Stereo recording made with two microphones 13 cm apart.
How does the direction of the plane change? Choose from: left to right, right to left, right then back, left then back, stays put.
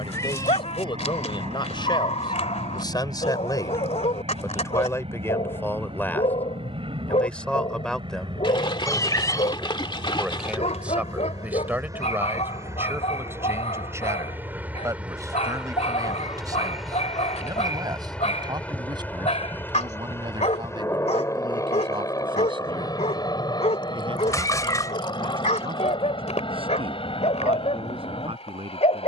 right to left.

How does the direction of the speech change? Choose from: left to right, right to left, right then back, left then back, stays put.
left to right.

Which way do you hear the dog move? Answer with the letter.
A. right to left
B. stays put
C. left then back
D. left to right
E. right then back
B.